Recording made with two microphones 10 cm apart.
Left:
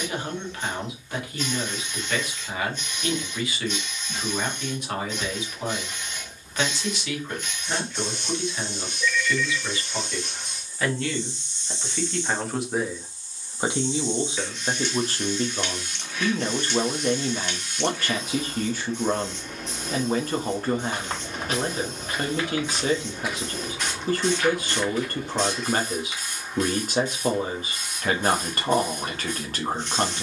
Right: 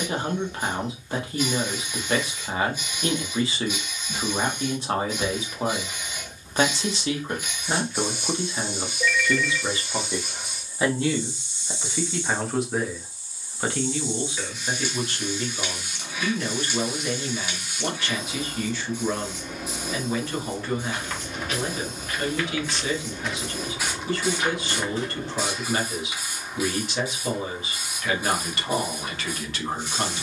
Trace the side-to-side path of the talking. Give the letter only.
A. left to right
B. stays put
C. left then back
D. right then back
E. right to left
E.